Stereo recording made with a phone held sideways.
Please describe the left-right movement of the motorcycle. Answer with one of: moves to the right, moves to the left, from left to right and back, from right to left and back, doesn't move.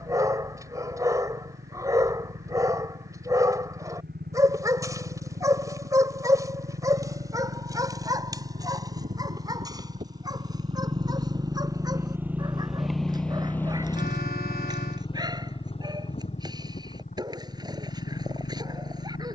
moves to the left.